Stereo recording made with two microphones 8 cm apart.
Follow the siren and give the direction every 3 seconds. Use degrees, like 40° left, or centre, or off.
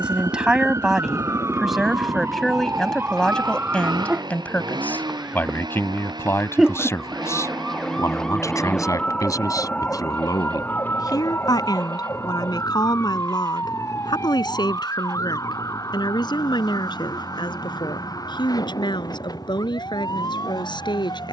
40° right, 20° right, centre, 20° left, 40° left, 50° left, 50° left.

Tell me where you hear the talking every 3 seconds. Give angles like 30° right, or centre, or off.
centre, 20° left, 40° left, 50° left, 60° left, 70° left, 70° left.